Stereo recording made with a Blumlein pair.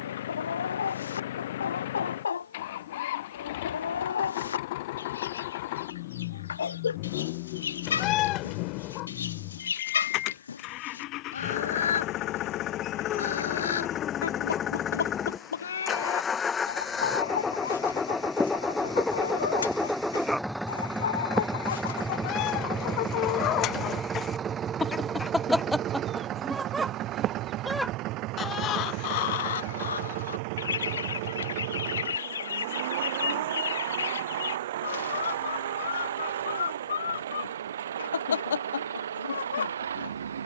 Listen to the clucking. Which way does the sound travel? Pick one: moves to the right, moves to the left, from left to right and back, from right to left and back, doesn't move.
from left to right and back.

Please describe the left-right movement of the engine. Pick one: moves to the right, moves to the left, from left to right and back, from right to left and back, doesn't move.
moves to the right.